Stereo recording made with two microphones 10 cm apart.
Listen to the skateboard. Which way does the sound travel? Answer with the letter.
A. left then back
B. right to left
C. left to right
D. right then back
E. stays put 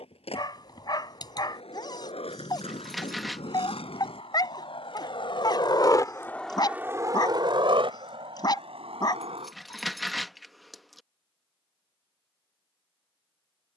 C.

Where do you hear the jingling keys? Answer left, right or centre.
centre.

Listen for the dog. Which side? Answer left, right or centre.
left.